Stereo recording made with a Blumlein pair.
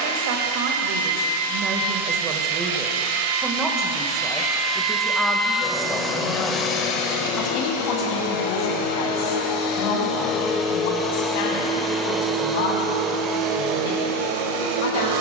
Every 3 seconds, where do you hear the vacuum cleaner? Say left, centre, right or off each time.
right, right, left, left, right.